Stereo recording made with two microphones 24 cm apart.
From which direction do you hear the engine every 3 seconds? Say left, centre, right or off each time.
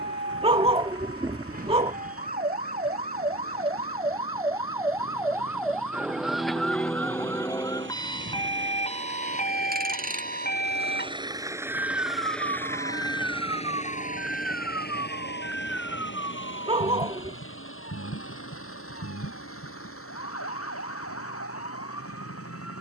right, right, right, right, left, left, left, left.